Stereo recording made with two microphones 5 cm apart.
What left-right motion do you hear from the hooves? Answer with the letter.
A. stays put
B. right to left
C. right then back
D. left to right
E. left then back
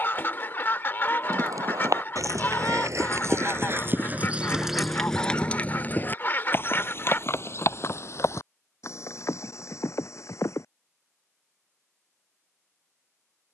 B.